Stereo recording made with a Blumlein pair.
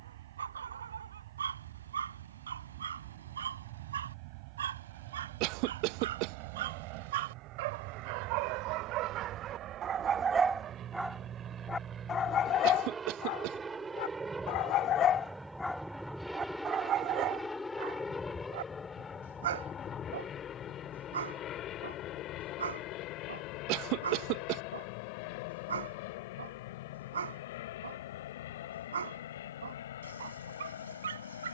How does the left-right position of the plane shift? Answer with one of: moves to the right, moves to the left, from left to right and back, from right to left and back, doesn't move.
moves to the left.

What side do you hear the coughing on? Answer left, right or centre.
right.